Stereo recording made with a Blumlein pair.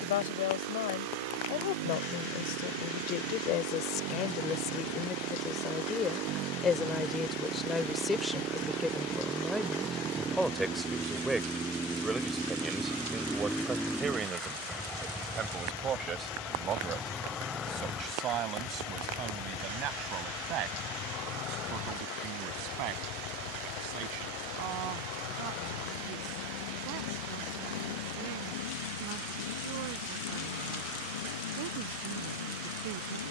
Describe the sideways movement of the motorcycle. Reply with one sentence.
In this clip you hear the motorcycle move from right to left.